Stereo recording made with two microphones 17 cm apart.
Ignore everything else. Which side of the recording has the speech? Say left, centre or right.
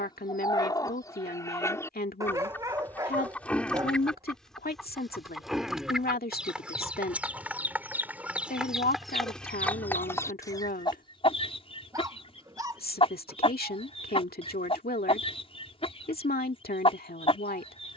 left.